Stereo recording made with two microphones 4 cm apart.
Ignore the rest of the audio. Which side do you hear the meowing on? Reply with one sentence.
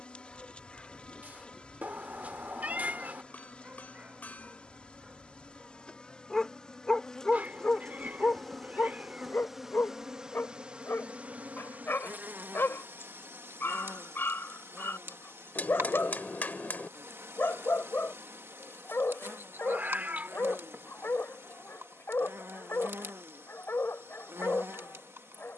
In this clip you hear the meowing on the right.